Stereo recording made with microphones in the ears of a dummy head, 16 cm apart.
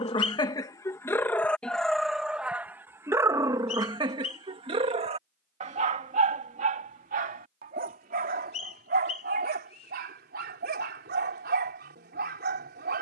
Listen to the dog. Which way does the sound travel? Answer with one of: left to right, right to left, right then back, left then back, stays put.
left to right.